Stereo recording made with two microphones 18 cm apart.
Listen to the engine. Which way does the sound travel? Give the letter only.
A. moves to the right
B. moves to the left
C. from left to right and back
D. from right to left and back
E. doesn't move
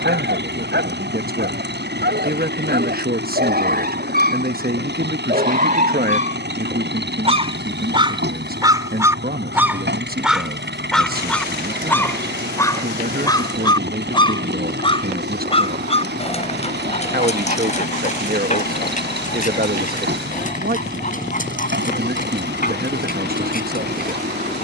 E.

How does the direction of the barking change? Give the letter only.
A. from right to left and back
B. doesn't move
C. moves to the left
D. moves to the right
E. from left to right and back
C.